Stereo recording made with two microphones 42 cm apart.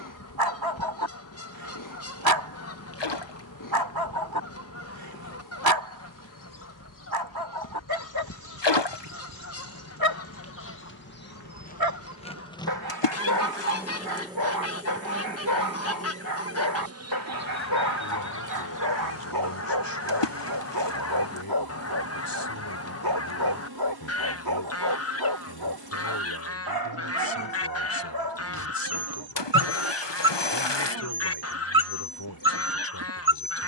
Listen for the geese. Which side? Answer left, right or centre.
left.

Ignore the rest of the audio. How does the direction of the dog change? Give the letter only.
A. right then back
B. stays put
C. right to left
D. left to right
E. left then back
B.